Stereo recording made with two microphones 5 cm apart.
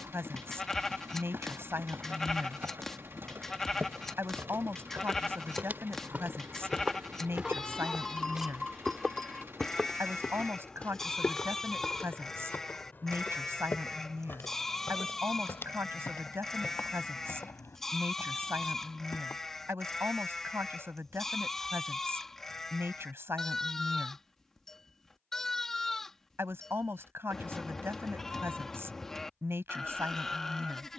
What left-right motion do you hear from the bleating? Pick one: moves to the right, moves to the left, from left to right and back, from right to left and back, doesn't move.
doesn't move.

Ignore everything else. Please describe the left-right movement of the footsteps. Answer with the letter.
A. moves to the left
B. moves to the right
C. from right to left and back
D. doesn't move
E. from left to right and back
A.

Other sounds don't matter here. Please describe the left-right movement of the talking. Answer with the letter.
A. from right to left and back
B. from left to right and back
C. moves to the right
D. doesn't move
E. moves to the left
D.